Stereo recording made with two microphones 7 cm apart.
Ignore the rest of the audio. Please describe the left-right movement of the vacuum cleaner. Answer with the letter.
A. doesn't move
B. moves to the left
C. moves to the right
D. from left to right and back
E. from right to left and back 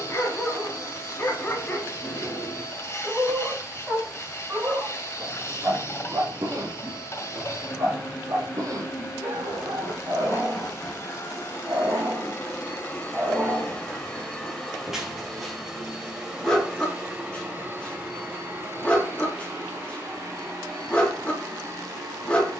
C.